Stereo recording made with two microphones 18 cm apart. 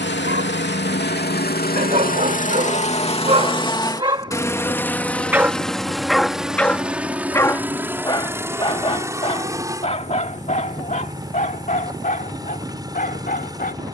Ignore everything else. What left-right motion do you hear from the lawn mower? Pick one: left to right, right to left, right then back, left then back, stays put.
left to right.